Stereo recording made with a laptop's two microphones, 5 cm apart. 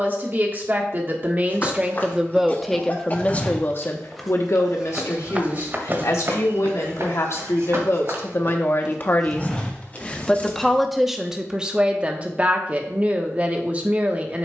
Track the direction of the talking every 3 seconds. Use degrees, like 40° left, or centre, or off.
20° right, 50° left, 60° left, centre, 30° right.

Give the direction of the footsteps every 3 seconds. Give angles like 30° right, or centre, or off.
30° left, 10° right, 50° right, 20° left, off.